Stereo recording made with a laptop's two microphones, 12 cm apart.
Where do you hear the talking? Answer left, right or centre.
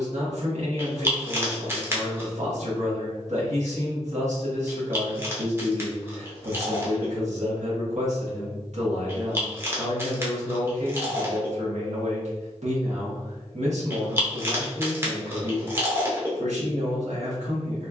right.